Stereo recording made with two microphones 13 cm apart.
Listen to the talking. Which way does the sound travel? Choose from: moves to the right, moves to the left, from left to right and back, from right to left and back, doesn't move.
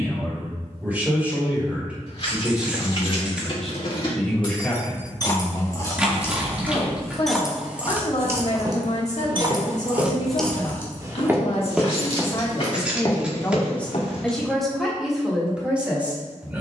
from right to left and back.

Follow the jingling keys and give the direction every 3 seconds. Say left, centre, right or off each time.
left, left, centre, centre, left, off.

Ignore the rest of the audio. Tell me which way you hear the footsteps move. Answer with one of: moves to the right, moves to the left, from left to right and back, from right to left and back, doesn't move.
moves to the left.